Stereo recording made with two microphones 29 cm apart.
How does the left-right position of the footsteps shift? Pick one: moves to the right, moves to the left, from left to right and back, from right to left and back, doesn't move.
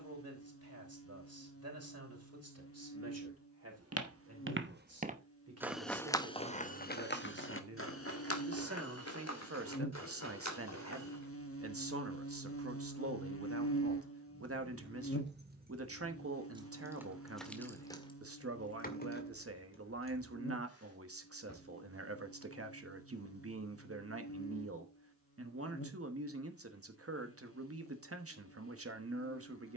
moves to the left.